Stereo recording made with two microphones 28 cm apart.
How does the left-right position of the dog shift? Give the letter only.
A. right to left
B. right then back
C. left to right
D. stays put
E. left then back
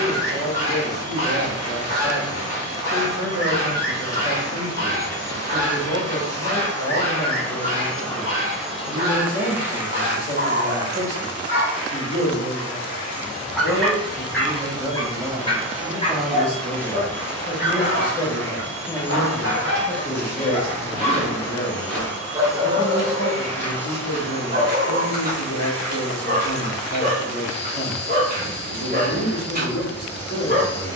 E.